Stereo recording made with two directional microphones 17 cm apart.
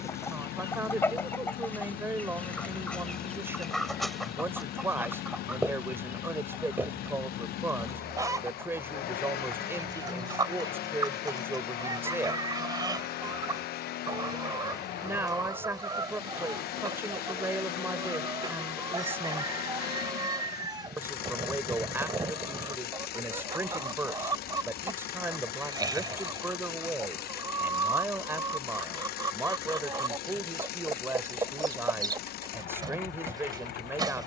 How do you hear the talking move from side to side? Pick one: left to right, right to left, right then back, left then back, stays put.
stays put.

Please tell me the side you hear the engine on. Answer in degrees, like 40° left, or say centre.
70° left.